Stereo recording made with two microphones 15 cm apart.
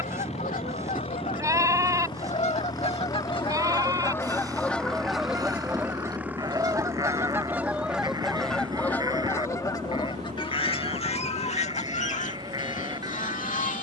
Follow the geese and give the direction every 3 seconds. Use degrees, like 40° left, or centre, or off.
50° left, 10° left, 10° right, 30° left, 50° left.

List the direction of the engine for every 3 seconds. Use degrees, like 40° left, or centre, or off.
30° left, 10° left, 20° right, 40° right, 50° right.